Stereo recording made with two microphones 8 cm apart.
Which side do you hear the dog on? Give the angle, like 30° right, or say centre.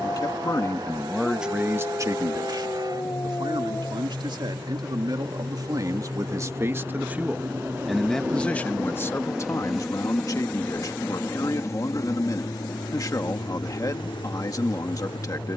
40° left.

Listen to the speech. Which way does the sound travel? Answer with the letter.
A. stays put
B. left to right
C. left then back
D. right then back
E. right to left
D.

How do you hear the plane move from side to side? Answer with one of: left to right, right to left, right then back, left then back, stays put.
right to left.